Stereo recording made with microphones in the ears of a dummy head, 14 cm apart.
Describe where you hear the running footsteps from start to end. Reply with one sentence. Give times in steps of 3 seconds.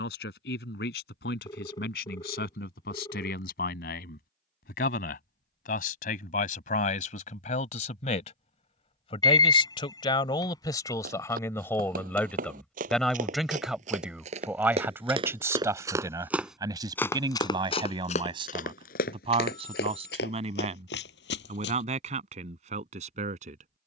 In this clip you hear the running footsteps not at all from 0 s, on the right from 9 s, in the centre from 15 s and on the left from 18 s.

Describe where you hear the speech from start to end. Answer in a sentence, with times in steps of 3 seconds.
In this clip you hear the speech on the left from 0 s, in the centre from 12 s and on the right from 15 s.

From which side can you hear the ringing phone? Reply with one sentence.
You can hear the ringing phone on the left.